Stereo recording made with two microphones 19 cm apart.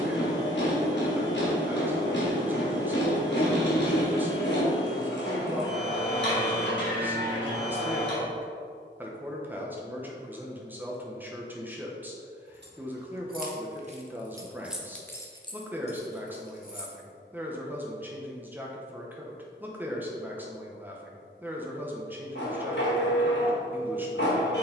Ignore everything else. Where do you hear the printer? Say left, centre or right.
left.